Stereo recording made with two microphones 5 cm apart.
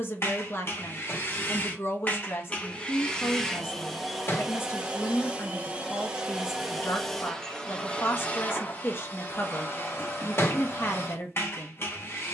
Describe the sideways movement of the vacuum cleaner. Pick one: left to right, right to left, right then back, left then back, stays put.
right then back.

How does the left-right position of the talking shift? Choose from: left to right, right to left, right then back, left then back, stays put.
stays put.